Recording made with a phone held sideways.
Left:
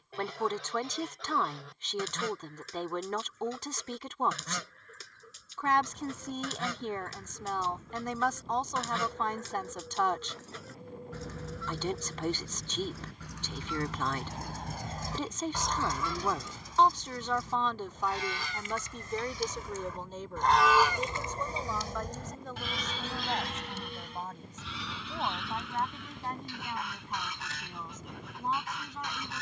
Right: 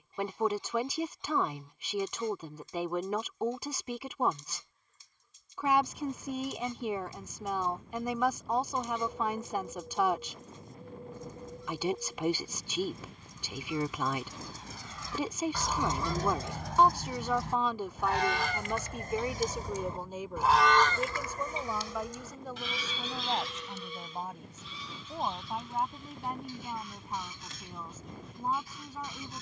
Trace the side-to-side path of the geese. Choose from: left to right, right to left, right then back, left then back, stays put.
right then back.